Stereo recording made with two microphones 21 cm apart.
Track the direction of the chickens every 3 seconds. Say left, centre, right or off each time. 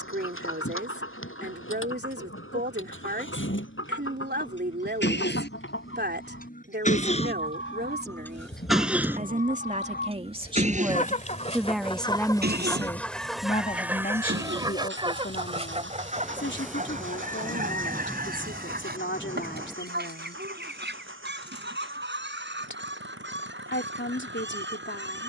left, left, left, left, centre, right, right, right, right.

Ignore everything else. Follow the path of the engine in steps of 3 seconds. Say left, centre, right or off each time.
left, left, left, right, right, right, right, right, right.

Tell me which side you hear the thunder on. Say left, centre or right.
centre.